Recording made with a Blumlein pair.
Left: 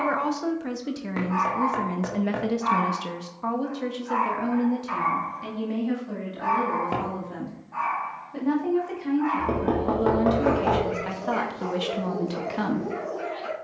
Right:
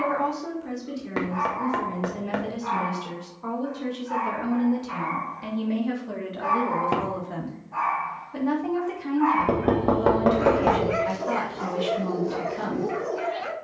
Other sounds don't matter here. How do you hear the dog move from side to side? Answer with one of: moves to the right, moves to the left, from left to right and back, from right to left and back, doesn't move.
moves to the right.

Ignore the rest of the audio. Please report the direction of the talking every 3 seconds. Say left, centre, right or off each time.
left, centre, centre, centre, left.